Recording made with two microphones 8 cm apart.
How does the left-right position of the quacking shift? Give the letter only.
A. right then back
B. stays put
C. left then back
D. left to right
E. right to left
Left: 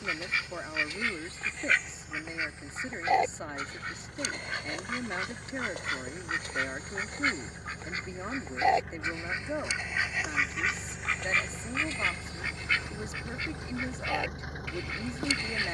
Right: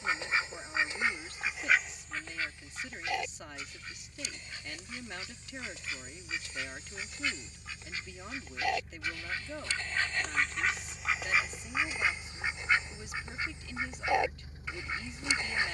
C.